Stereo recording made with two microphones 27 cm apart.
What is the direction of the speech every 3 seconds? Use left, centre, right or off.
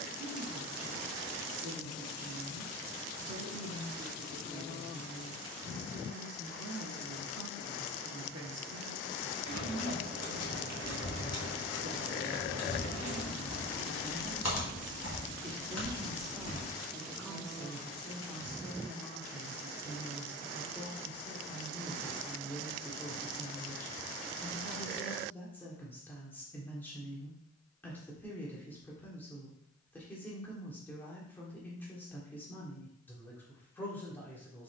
right, right, right, right, right, centre, centre, centre, centre, centre, centre, centre.